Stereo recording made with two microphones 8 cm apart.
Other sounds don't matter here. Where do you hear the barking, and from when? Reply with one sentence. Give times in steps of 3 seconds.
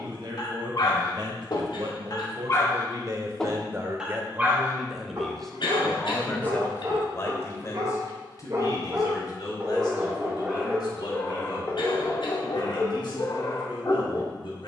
In this clip you hear the barking on the left from 0 s, on the right from 3 s, in the centre from 9 s and on the left from 12 s.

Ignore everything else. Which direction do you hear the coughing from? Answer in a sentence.
You can hear the coughing on the left.